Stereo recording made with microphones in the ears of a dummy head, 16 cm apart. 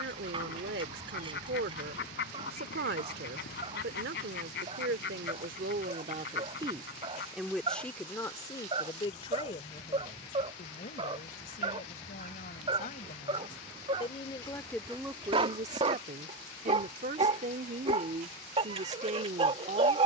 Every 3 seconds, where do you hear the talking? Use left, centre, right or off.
right, right, centre, left, left, right, right.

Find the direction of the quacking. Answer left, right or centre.
left.